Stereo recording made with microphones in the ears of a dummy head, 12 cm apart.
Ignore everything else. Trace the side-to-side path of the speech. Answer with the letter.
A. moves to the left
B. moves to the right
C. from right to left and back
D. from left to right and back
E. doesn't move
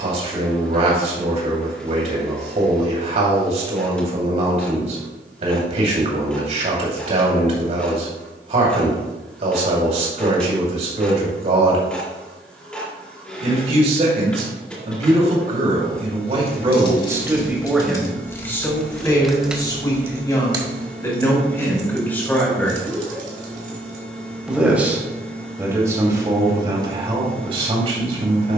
C.